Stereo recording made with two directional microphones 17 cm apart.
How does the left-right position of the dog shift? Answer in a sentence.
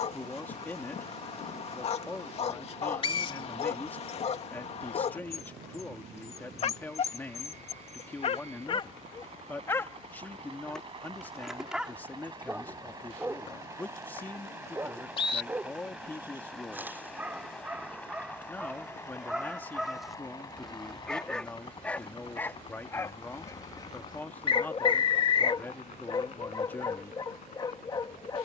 In this clip you hear the dog go right and come back.